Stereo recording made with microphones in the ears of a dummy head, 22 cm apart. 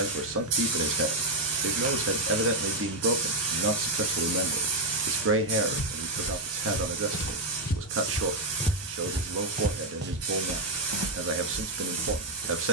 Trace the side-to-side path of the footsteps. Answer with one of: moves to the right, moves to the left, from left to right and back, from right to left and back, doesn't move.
moves to the right.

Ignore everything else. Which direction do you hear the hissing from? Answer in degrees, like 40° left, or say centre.
70° right.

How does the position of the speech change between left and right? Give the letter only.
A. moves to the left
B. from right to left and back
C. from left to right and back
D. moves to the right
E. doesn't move
E.